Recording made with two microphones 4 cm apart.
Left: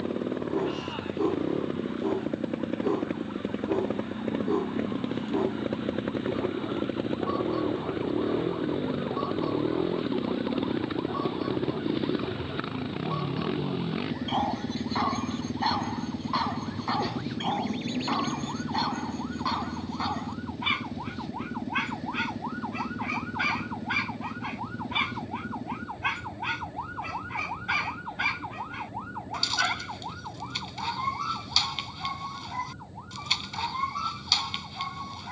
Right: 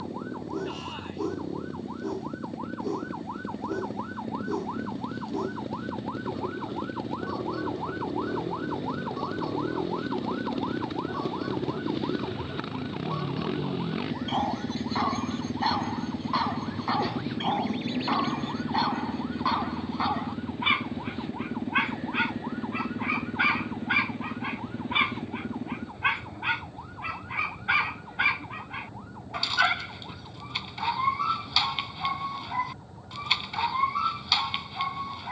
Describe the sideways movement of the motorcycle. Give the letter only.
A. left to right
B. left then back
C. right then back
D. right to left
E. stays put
A.